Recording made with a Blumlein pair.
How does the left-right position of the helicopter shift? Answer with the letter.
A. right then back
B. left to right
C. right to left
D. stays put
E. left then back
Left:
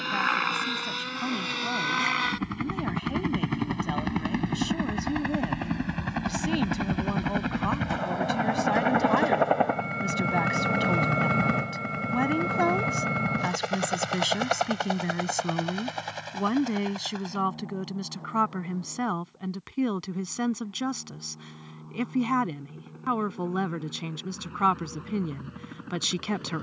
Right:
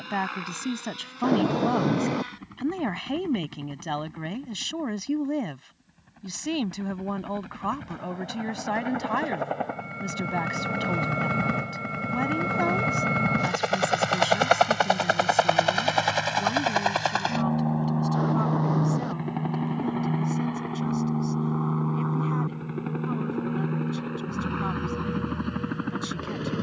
B.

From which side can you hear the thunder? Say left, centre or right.
right.